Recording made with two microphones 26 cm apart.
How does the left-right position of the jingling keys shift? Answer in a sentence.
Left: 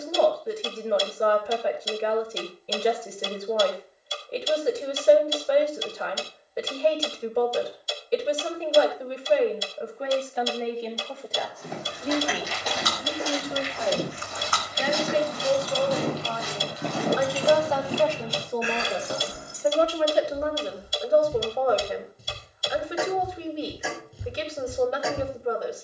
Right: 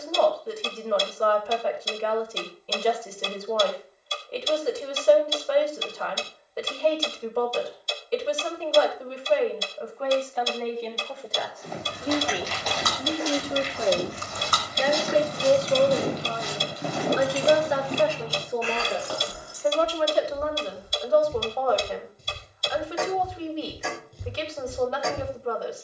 In this clip you hear the jingling keys go from the right side to the left.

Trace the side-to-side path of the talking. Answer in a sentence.
You can hear the talking go right and come back.